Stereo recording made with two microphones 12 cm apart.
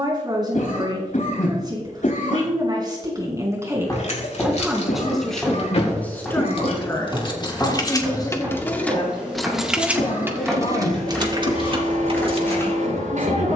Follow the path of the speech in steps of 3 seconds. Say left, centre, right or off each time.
right, centre, left, left, left.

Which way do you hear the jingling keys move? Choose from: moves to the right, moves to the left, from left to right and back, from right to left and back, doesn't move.
moves to the right.